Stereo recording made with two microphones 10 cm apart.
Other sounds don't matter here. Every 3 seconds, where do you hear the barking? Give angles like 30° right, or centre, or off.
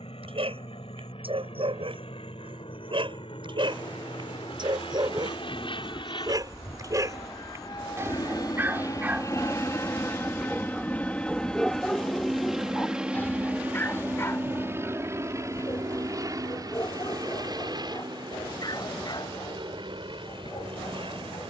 60° right, 50° right, 30° right, centre, 20° left, 40° left, 50° left.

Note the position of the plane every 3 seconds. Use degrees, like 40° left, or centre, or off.
70° left, 60° left, 50° left, 20° left, 10° right, 30° right, 50° right.